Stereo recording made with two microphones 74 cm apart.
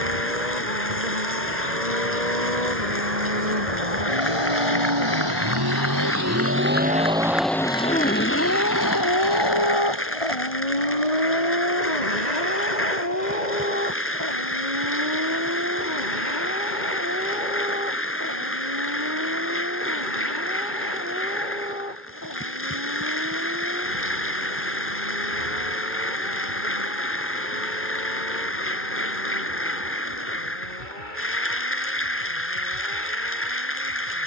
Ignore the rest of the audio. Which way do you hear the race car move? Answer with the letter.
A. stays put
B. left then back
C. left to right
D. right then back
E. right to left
E.